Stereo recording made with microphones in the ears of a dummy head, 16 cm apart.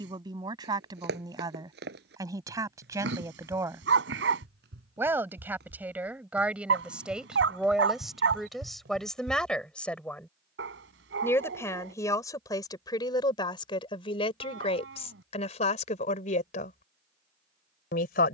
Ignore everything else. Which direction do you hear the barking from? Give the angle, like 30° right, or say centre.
70° right.